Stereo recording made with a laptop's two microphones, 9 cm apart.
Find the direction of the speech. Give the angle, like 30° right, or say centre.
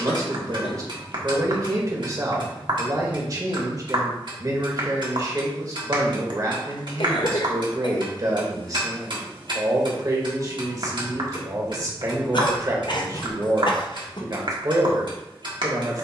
40° right.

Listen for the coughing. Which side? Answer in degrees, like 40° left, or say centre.
50° left.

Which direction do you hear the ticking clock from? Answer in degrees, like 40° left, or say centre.
60° right.